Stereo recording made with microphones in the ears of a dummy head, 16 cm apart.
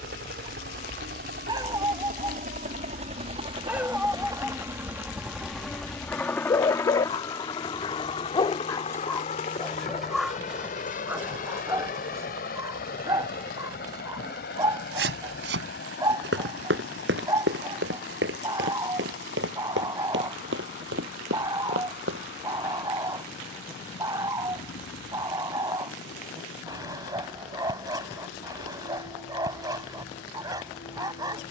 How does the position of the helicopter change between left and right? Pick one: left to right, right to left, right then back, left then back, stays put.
right to left.